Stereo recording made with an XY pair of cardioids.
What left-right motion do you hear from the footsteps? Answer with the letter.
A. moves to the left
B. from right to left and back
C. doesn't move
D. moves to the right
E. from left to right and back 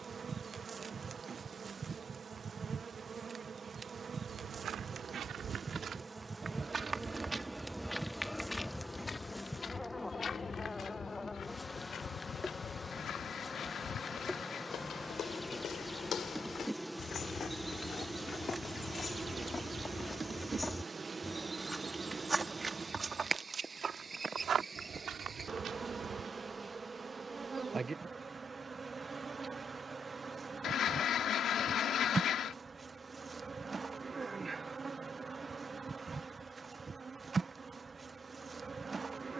B.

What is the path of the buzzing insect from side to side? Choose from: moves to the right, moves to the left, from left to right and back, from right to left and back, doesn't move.
from right to left and back.